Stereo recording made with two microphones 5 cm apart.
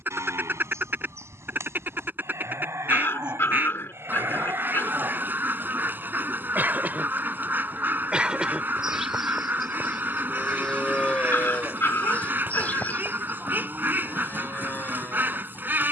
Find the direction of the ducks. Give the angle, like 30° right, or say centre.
40° right.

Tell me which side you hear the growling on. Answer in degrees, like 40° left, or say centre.
60° left.